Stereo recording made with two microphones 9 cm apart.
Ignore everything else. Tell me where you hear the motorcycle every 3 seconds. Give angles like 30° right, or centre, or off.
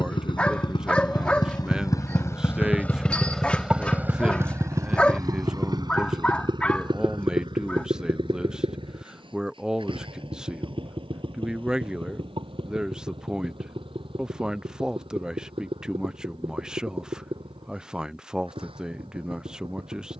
40° left, 30° right, 60° right, 70° right, 80° right, 80° right, 80° right.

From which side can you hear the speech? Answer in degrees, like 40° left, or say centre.
10° right.